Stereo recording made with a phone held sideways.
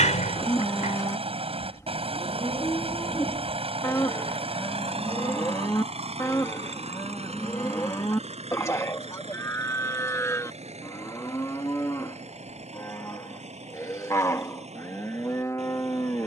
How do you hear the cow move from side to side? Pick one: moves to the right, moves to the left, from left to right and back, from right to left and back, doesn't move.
doesn't move.